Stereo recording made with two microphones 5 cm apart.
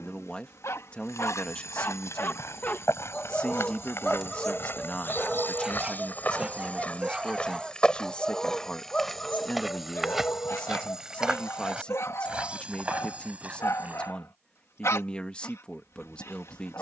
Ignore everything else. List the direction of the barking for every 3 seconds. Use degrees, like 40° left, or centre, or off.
60° left, 10° left, 10° right, 50° left, 70° left, 70° left.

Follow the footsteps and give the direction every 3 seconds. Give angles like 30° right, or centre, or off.
70° left, 50° left, 20° left, 10° right, 30° right, off.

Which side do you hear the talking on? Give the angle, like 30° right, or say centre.
20° left.